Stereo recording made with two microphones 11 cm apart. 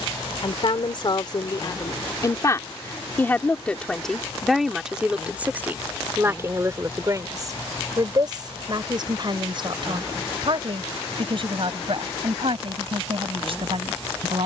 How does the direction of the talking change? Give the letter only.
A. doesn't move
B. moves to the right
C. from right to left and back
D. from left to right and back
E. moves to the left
B.